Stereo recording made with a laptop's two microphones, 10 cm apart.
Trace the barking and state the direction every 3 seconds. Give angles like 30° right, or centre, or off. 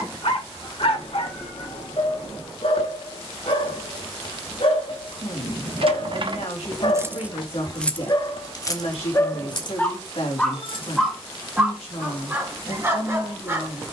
70° left, 70° left, 50° left, 10° left, 20° right.